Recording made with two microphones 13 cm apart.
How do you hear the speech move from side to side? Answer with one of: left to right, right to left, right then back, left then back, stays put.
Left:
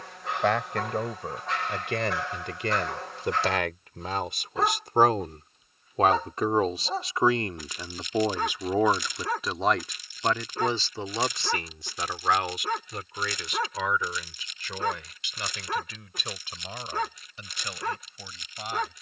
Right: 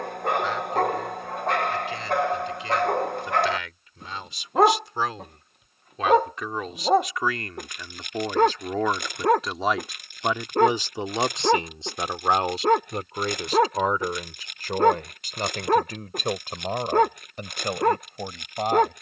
left to right.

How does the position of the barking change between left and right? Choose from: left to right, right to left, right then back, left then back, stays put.
stays put.